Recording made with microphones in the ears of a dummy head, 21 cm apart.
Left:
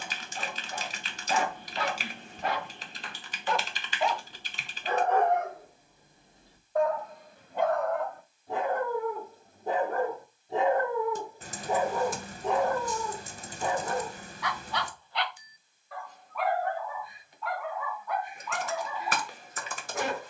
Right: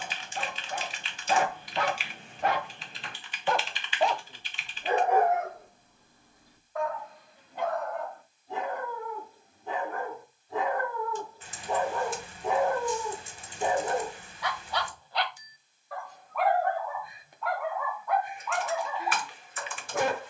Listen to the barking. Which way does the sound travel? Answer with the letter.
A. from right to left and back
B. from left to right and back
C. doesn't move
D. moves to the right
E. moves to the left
A.